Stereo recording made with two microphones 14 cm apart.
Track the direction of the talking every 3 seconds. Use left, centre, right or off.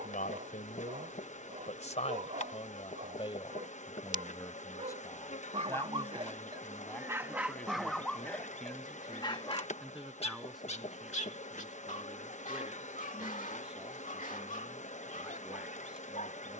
left, left, centre, centre, centre, centre.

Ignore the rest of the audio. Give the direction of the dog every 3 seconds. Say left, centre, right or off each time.
right, right, centre, left, left, left.